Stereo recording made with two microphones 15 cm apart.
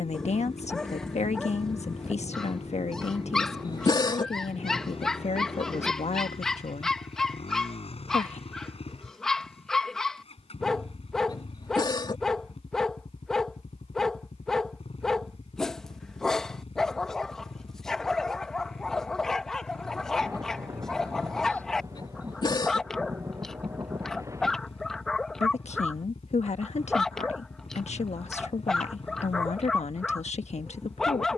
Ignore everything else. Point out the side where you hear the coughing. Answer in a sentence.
In this clip you hear the coughing on the left.